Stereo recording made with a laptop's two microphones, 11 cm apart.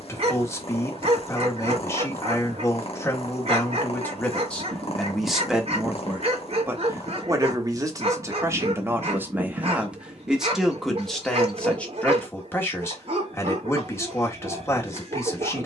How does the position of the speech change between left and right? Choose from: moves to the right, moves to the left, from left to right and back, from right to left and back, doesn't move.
from left to right and back.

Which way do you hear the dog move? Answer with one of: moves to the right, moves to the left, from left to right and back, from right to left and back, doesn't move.
doesn't move.